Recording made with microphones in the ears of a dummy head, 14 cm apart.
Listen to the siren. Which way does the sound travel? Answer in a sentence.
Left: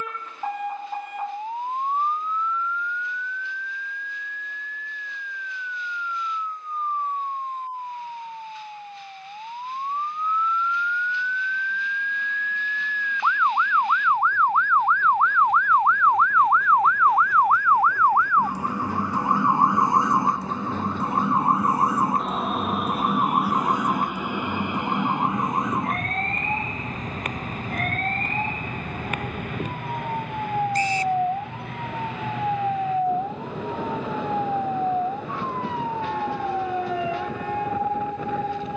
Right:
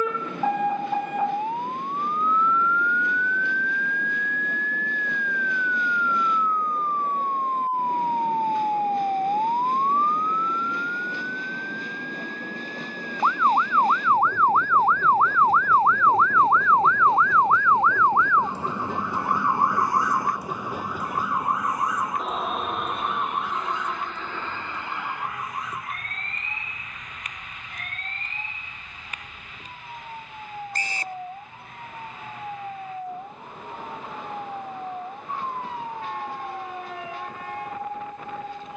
You can hear the siren move to the left.